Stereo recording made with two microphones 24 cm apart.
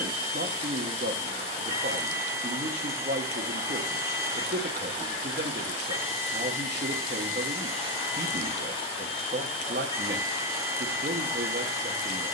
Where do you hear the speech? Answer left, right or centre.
right.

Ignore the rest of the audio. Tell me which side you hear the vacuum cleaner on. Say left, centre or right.
right.